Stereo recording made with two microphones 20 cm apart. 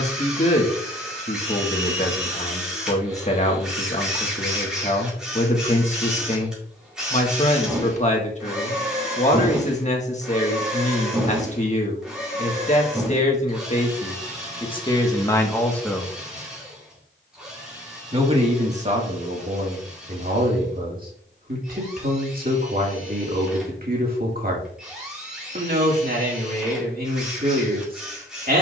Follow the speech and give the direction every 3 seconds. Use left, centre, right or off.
left, left, left, left, left, centre, right, right, right, right.